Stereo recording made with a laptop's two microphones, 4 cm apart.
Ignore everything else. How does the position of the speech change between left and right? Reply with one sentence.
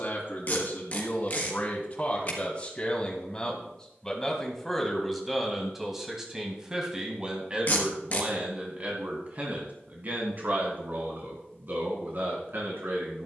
In this clip you hear the speech move from left to right.